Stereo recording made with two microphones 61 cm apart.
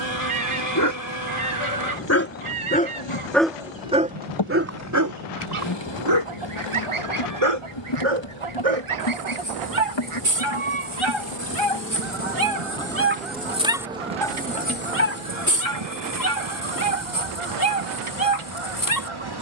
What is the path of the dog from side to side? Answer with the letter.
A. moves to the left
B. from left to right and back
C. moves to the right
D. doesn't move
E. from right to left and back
B.